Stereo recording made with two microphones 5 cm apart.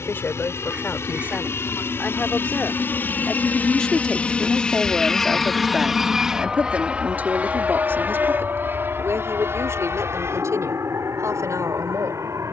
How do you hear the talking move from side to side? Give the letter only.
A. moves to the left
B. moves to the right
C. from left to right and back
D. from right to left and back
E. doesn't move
B.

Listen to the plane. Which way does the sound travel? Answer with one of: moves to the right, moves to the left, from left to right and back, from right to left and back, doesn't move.
moves to the right.